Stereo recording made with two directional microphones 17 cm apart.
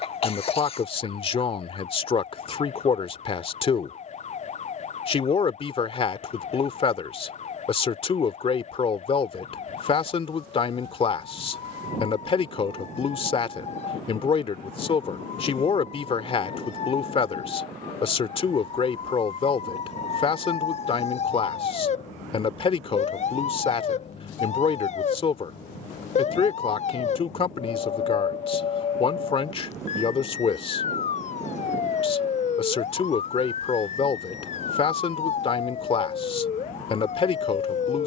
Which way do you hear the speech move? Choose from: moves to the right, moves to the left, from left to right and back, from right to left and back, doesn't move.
doesn't move.